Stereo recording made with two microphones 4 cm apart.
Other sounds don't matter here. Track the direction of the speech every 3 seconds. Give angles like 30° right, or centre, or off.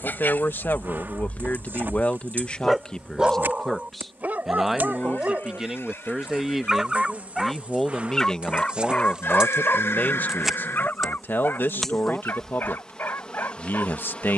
50° left, centre, 10° left, 50° left, 60° left.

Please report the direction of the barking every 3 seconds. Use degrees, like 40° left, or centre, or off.
30° left, 40° right, centre, 40° left, 60° left.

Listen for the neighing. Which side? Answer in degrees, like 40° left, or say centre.
70° left.